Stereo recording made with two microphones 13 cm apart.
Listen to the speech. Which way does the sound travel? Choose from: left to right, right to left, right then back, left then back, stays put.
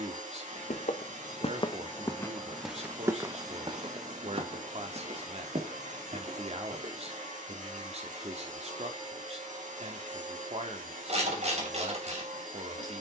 stays put.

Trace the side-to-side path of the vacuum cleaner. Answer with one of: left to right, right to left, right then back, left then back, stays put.
stays put.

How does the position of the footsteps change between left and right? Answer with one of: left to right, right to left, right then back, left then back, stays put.
left to right.